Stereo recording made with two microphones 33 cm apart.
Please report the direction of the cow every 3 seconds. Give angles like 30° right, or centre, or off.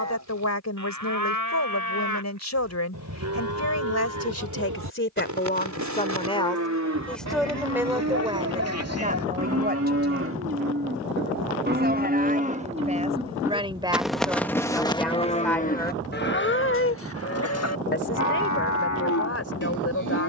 60° right, 60° right, 50° right, 40° right, 10° right, 30° left, 60° left.